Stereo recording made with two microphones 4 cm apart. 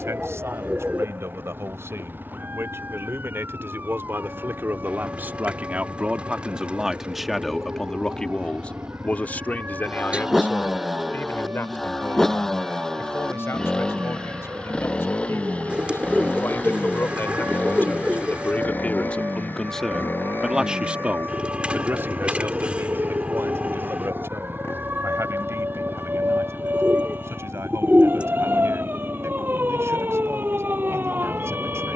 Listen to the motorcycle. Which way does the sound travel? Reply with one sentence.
You can hear the motorcycle move from right to left.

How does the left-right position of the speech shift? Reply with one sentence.
In this clip you hear the speech go left and come back.